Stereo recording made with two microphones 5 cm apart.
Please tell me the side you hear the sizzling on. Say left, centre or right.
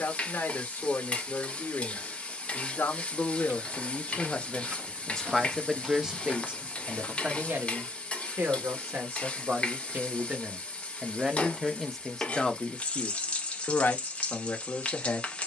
left.